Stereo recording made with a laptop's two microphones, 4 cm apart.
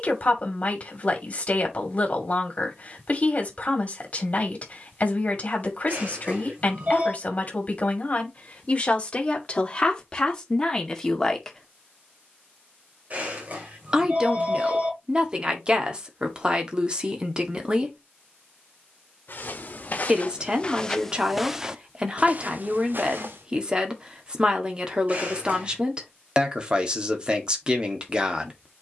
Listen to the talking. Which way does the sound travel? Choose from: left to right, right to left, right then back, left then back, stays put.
left to right.